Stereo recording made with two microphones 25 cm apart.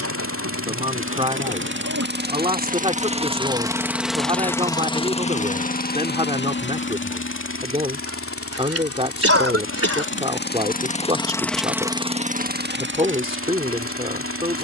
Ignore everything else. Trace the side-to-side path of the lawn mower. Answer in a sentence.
In this clip you hear the lawn mower move from right to left and back again.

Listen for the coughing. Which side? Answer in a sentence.
You can hear the coughing on the right.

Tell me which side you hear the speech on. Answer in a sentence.
You can hear the speech on the right.